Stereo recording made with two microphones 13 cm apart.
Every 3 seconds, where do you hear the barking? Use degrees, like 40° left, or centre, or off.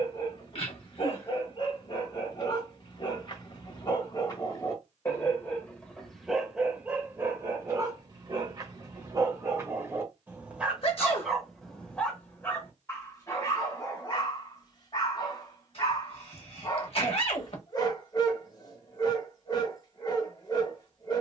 40° left, 30° left, 20° right, 10° right, 20° left, 30° left, 30° left.